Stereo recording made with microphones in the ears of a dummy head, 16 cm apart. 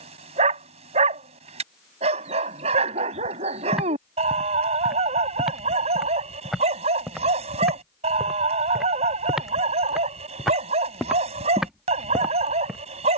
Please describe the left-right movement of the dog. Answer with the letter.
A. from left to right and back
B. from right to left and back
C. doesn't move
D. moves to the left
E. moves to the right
C.